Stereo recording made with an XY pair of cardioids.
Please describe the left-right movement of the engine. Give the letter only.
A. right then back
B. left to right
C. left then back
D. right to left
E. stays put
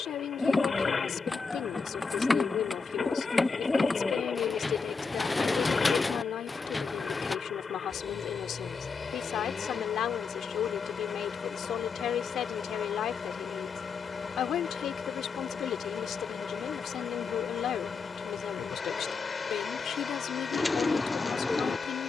E.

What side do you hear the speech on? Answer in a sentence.
You can hear the speech on the left.